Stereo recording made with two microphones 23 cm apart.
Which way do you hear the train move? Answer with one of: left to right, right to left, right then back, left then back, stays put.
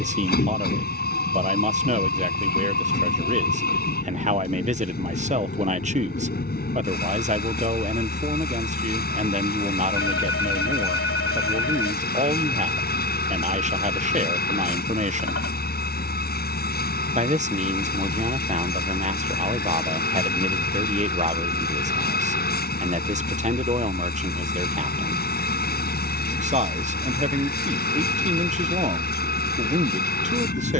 stays put.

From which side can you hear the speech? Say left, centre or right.
right.